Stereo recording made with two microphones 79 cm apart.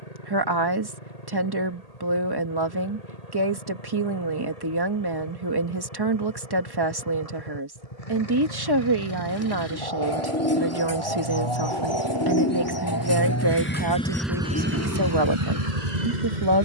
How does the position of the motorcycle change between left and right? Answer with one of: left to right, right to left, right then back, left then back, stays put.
left to right.